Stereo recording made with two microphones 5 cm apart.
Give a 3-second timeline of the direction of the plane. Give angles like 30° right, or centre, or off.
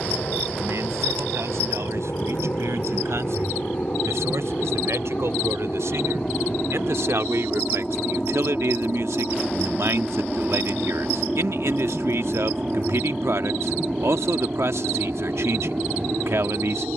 40° left, 30° left, 20° left, centre, 20° right, 40° right.